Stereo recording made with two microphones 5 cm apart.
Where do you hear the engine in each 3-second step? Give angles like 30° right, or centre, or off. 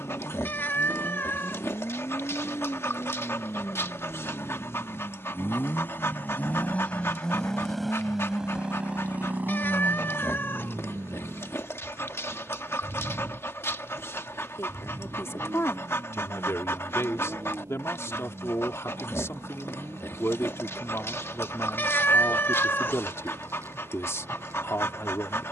80° left, 60° left, 10° left, 50° right, 60° right, 70° right, 70° right, 80° right, 80° right.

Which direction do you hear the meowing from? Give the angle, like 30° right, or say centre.
50° left.